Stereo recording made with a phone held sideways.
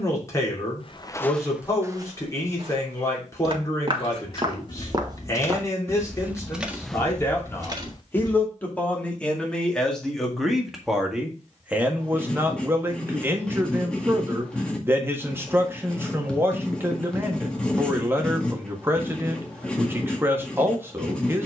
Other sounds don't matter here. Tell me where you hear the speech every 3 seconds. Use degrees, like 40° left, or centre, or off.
20° left, 20° left, 20° left, centre, 20° right, 20° right, 20° right.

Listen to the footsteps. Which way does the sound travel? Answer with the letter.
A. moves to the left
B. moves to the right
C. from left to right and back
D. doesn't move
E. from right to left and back
C.